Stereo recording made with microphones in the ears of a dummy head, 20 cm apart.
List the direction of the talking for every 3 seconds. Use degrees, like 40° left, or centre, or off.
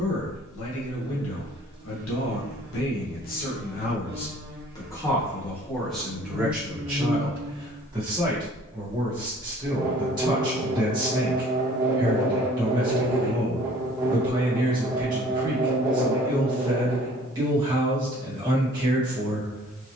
60° left, 20° left, 10° right, 20° right, 20° right, 20° right, 20° right.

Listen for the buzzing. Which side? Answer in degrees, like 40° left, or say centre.
10° right.